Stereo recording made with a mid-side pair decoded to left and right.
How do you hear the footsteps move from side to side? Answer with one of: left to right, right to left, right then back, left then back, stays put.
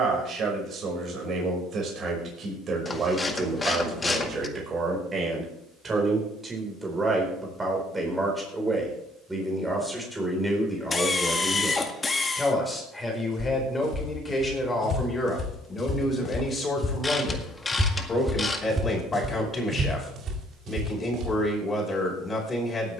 left to right.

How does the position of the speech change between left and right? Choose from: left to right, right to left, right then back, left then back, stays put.
right to left.